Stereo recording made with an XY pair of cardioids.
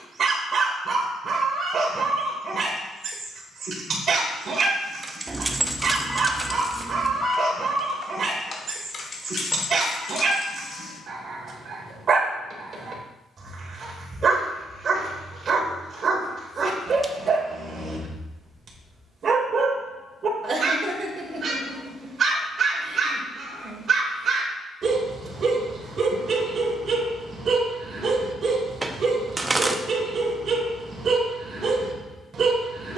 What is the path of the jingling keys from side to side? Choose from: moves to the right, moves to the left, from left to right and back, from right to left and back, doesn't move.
moves to the left.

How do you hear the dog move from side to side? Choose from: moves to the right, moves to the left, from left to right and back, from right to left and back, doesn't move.
doesn't move.